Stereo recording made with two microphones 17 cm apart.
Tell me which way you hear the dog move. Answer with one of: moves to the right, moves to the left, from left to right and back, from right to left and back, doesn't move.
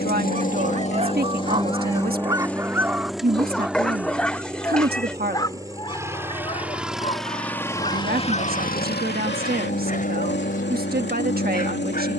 moves to the left.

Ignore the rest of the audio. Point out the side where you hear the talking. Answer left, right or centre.
right.